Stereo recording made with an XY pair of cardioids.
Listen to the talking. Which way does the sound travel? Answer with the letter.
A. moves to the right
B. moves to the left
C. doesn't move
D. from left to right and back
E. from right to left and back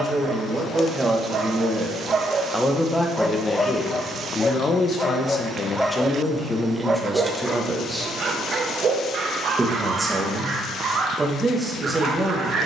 E.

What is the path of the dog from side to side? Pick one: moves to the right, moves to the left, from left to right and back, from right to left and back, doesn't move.
from right to left and back.